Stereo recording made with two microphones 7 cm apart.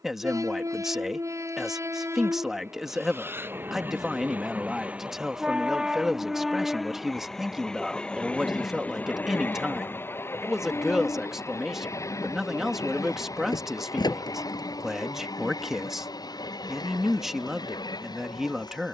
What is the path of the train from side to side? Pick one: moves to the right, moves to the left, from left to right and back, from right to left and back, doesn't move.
moves to the left.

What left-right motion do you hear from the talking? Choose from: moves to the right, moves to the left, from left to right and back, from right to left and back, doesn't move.
doesn't move.